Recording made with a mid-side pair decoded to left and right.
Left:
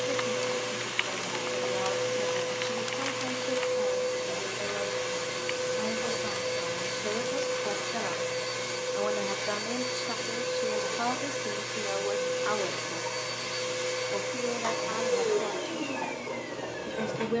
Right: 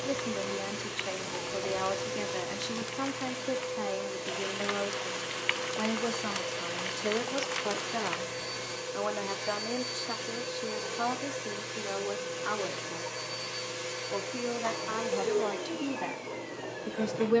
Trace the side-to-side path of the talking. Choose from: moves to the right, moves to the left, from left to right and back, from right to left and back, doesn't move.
from right to left and back.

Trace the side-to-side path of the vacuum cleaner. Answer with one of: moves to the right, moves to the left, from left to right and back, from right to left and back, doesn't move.
doesn't move.